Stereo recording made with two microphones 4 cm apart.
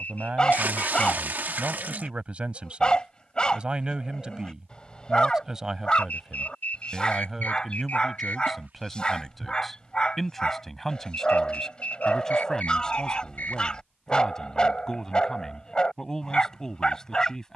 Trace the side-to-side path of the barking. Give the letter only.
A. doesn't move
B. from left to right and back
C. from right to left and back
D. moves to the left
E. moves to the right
A.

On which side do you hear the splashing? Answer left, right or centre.
right.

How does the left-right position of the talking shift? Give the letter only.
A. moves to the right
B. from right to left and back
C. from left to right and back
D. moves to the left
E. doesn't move
D.